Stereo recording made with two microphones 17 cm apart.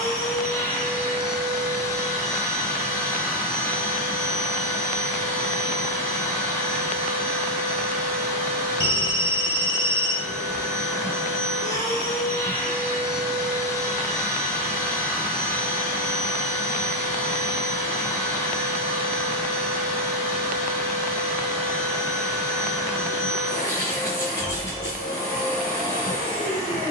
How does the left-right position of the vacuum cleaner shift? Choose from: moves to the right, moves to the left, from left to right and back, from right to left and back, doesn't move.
doesn't move.